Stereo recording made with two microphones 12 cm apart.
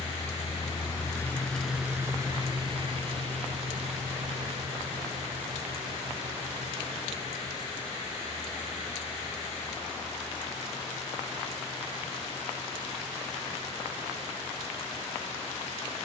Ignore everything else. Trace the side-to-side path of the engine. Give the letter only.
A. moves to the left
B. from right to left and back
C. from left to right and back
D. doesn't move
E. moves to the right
E.